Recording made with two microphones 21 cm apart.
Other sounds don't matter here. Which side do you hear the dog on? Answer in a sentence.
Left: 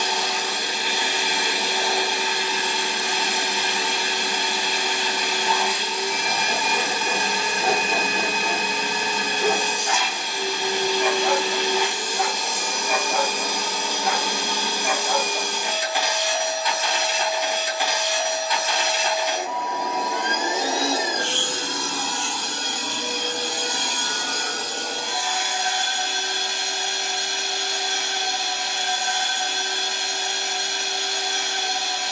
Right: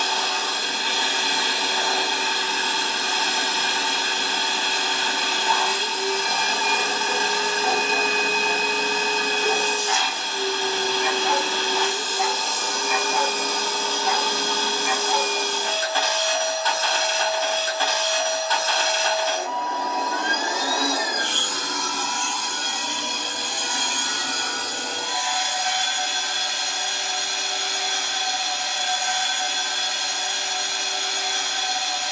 In this clip you hear the dog on the left.